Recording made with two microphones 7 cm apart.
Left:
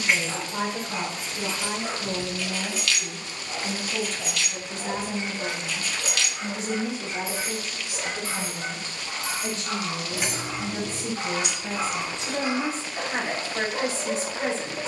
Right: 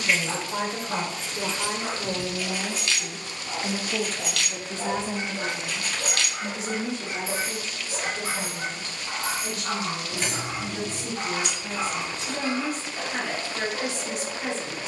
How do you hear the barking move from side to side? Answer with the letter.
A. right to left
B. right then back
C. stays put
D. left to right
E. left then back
A.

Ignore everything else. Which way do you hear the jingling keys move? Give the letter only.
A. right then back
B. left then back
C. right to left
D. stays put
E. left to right
A.